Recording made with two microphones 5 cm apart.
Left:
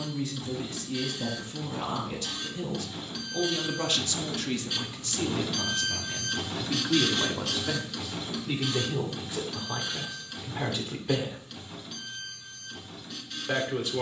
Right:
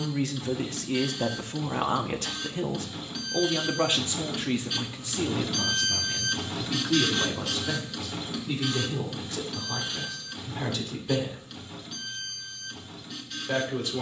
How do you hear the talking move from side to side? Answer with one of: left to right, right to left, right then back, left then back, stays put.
right to left.